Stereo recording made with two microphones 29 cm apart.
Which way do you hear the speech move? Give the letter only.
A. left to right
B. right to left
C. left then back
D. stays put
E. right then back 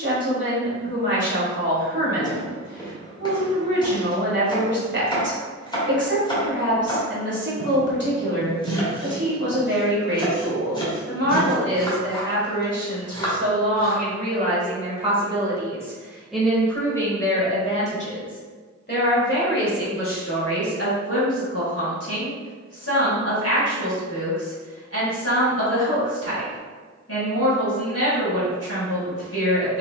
B.